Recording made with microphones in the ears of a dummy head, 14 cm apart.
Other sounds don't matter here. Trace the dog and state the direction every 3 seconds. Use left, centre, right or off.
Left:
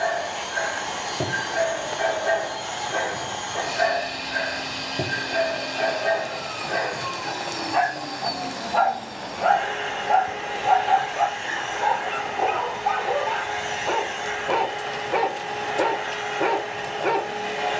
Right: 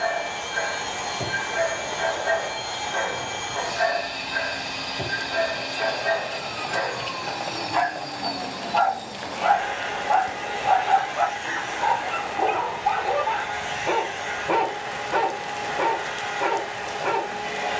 left, left, left, left, centre, left.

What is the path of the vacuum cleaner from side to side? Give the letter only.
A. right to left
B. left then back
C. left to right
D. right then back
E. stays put
E.